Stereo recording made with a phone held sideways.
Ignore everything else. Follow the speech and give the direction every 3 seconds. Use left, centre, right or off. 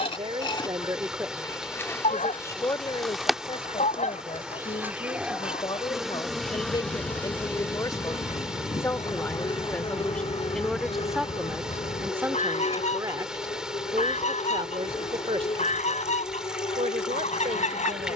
centre, left, left, centre, right, right.